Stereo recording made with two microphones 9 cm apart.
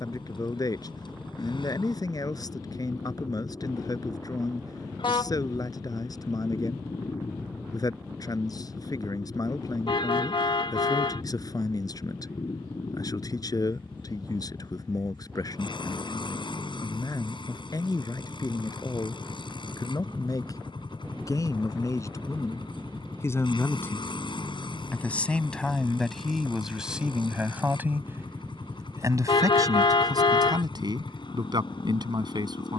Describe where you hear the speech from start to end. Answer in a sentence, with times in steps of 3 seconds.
You can hear the speech on the left from 0 s, in the centre from 24 s and on the right from 27 s.